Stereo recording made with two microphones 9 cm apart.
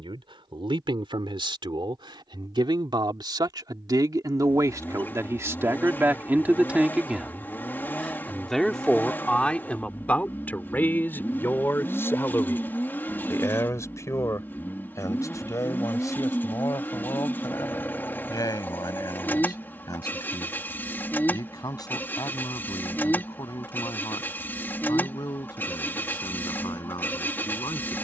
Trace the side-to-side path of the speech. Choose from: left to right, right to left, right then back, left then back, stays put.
right to left.